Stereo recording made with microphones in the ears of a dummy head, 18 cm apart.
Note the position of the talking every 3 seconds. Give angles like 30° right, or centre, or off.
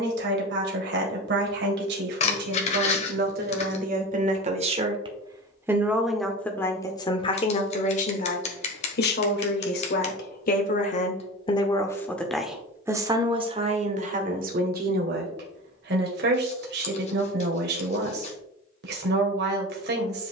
60° right, 30° right, 30° left, 40° left, 30° right, 50° right, 50° right.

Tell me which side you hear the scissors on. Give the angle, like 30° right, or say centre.
30° left.